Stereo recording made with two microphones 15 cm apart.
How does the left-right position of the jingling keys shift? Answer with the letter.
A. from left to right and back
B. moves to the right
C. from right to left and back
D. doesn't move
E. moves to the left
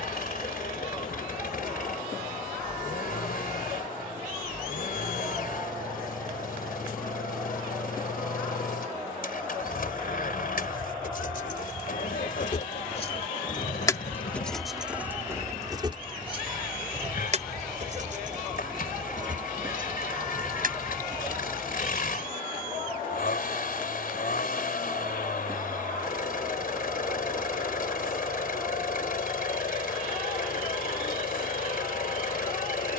B.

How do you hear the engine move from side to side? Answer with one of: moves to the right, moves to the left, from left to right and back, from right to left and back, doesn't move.
doesn't move.